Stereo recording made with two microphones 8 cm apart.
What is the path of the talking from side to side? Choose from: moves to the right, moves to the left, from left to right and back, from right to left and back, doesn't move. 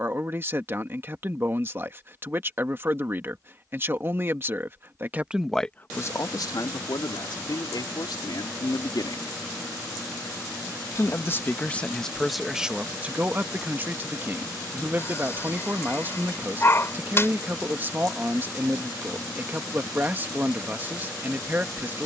from right to left and back.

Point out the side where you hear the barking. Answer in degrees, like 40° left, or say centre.
30° left.